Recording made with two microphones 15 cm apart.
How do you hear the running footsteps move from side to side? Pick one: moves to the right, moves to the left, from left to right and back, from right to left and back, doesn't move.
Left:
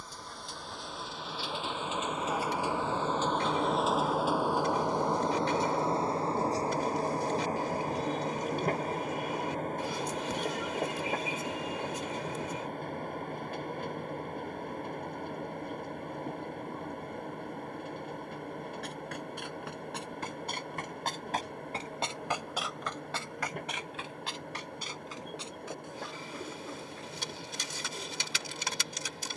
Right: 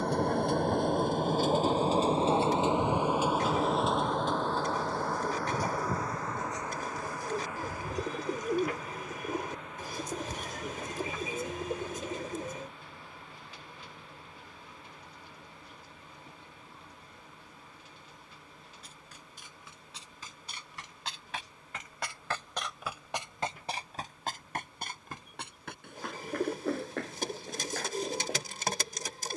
moves to the right.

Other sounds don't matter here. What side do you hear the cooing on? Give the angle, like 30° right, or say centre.
50° right.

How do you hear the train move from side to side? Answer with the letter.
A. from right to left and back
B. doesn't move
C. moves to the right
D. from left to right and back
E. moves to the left
E.